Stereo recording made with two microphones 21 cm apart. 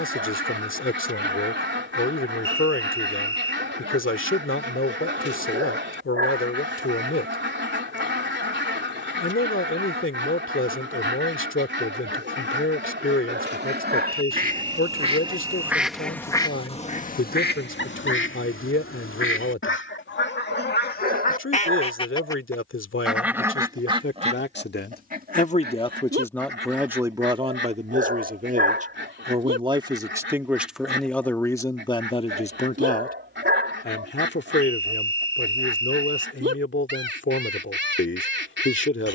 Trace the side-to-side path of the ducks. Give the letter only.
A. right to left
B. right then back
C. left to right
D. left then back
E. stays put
D.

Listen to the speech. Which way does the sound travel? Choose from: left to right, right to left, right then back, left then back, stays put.
right then back.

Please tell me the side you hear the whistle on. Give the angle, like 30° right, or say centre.
70° right.